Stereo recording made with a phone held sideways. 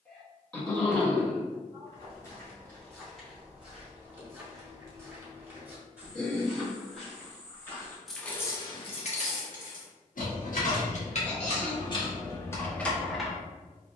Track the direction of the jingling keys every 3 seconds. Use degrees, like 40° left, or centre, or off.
off, off, 20° left, 50° left, 10° left.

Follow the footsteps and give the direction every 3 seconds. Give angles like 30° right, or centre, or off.
20° left, 10° right, 10° left, off, off.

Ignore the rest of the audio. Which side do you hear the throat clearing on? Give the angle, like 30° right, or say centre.
10° left.